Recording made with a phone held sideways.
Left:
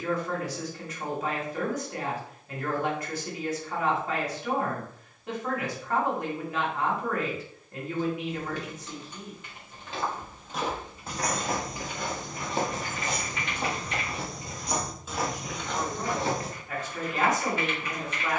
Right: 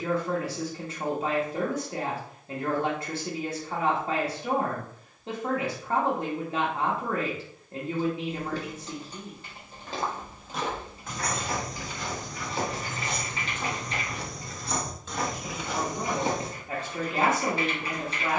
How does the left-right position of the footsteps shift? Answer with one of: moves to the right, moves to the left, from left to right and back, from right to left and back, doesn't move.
from right to left and back.